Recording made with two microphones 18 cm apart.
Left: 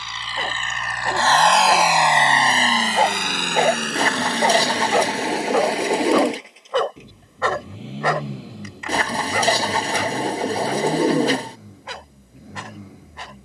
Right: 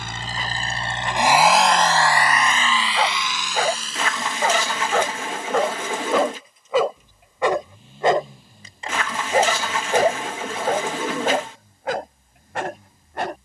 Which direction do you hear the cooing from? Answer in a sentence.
You can hear the cooing on the left.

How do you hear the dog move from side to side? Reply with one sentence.
In this clip you hear the dog move from left to right.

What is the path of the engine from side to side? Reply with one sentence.
You can hear the engine move from right to left.